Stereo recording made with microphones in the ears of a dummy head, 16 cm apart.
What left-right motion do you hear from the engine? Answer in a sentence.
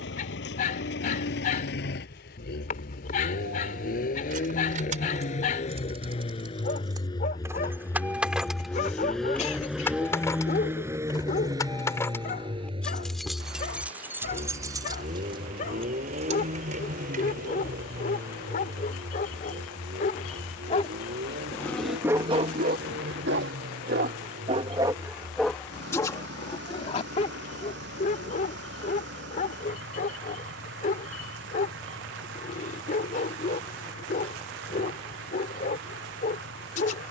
In this clip you hear the engine travel towards the right.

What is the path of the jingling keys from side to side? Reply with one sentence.
In this clip you hear the jingling keys go left and come back.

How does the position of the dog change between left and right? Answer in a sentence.
You can hear the dog go right and come back.